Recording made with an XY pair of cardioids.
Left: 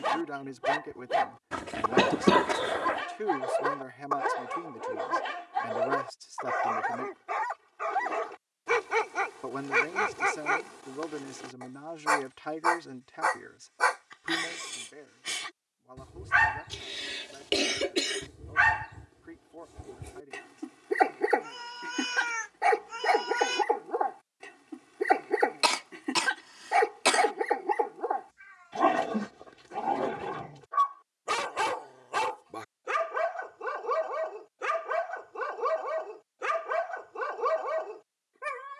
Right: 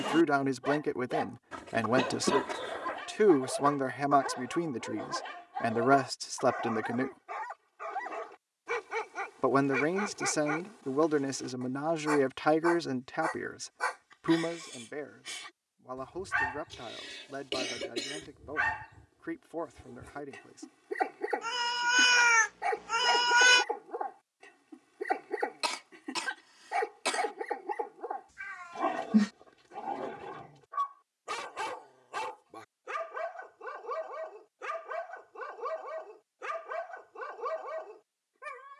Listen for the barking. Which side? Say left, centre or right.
left.